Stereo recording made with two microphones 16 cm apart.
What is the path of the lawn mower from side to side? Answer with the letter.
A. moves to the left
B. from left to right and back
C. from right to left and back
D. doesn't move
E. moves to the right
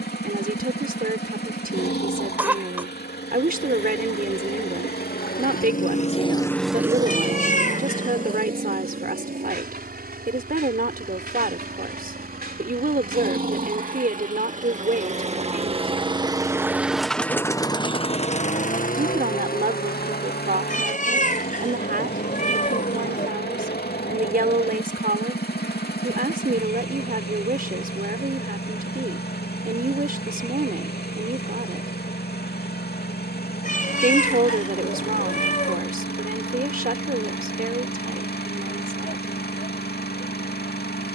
B.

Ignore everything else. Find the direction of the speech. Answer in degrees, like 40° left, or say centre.
60° right.